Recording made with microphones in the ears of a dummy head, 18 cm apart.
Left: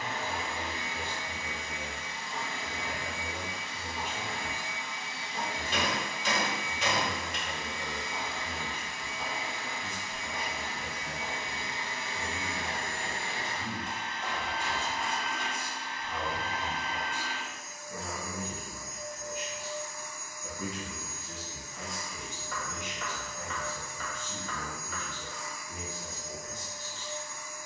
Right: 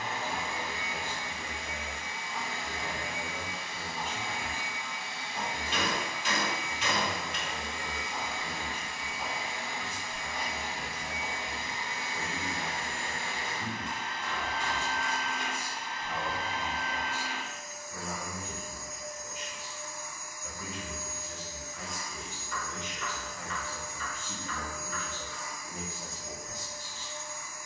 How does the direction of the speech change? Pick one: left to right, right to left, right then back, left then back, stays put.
left then back.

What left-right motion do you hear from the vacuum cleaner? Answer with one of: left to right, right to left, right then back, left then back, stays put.
right then back.